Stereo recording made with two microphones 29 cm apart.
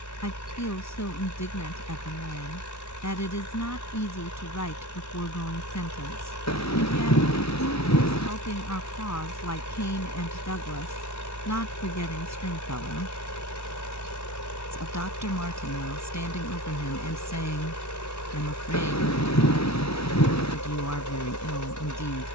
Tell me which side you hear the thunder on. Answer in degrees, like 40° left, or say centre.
60° left.